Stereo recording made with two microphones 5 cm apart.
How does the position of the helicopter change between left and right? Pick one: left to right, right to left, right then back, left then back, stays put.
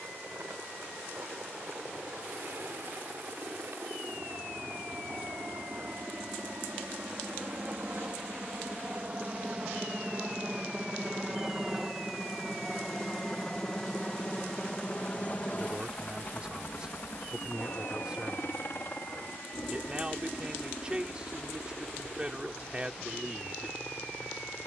right to left.